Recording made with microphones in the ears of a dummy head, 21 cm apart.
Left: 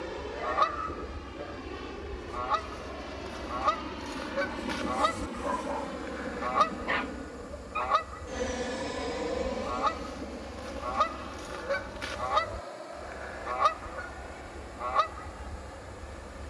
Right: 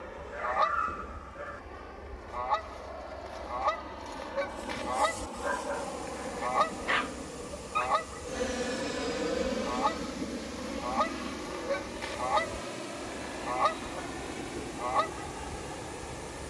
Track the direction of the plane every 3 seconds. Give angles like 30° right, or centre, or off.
50° left, 30° left, 10° left, 20° right, 40° right, 50° right.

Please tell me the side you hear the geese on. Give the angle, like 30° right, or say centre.
10° left.